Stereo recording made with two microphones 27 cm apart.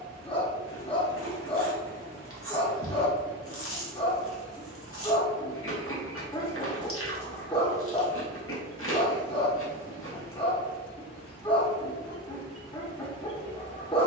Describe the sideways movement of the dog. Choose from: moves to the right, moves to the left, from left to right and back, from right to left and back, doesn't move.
doesn't move.